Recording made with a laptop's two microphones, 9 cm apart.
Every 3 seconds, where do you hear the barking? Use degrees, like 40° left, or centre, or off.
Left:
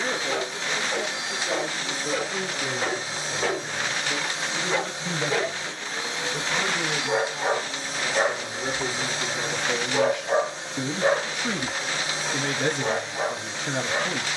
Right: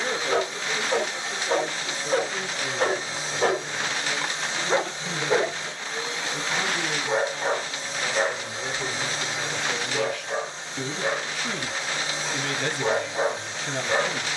50° right, 30° right, centre, 30° left, 30° right.